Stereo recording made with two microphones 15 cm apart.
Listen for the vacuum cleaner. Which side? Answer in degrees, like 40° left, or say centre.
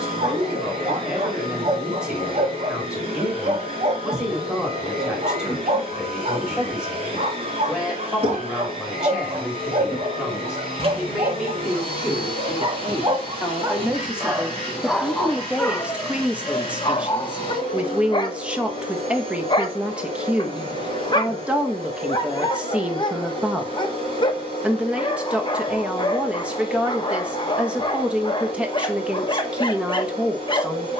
40° right.